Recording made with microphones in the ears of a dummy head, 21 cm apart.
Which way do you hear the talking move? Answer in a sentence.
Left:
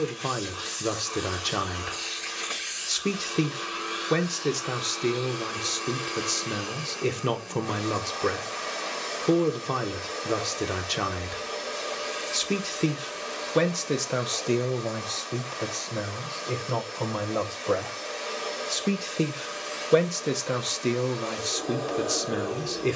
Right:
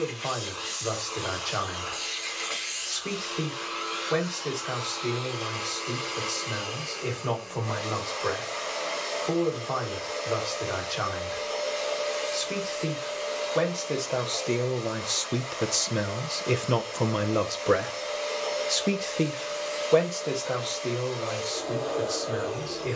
In this clip you hear the talking move from left to right and back again.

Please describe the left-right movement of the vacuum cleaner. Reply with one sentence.
You can hear the vacuum cleaner stay put.